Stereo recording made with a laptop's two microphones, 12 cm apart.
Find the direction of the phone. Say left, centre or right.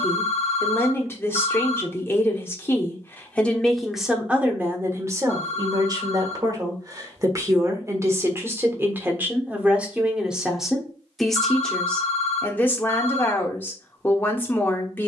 left.